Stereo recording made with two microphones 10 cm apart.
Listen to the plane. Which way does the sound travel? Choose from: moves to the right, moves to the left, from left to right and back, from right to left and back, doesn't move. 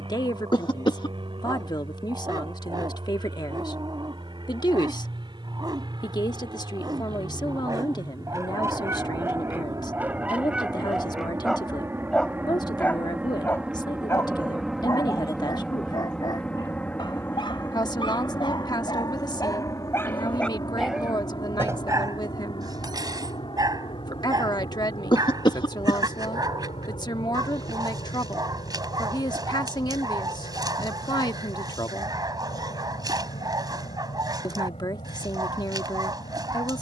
moves to the left.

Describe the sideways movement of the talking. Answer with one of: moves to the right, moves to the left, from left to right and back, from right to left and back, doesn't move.
doesn't move.